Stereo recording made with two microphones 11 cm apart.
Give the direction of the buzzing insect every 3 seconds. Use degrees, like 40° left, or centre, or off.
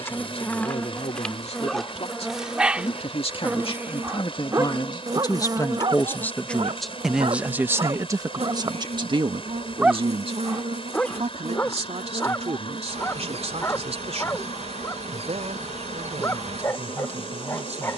centre, 20° right, 50° right, 70° right, 70° right, 70° right.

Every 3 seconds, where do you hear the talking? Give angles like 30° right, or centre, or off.
70° left, 40° left, 20° right, 60° right, 70° right, 80° right.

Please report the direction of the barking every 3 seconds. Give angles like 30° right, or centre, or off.
centre, 30° right, 50° right, centre, 20° left, 20° left.